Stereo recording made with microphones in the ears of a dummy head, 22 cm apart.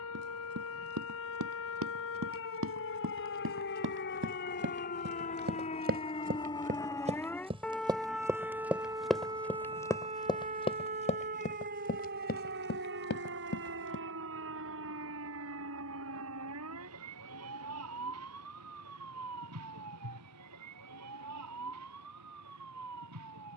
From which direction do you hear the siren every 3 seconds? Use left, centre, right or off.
left, left, centre, right, right, right, right, right.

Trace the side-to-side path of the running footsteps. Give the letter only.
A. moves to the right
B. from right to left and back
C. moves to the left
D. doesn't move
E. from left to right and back
C.